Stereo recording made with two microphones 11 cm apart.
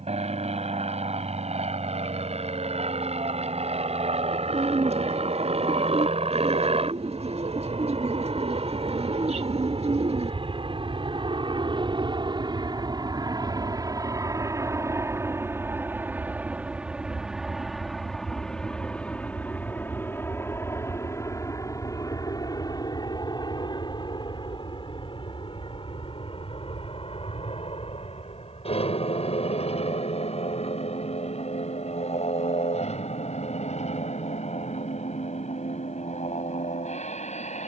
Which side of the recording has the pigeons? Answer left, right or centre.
right.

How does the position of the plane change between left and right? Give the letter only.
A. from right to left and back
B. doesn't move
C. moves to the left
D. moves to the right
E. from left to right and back
C.